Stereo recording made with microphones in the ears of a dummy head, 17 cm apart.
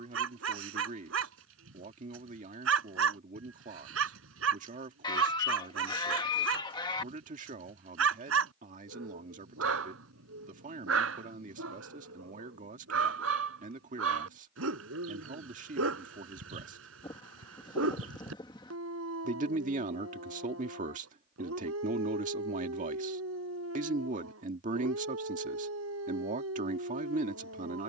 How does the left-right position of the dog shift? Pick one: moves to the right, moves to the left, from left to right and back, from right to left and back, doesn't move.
doesn't move.